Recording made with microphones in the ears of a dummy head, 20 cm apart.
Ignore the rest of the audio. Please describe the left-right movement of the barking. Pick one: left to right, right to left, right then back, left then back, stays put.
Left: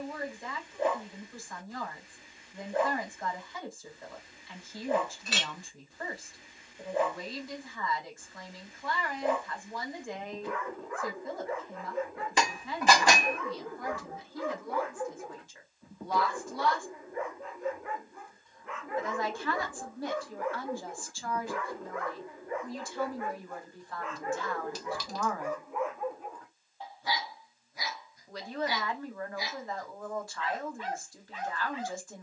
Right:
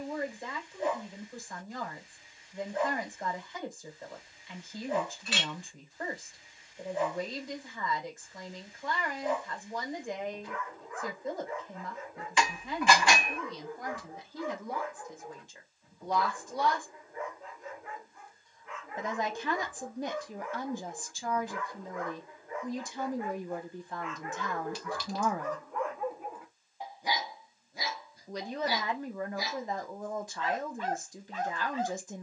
left to right.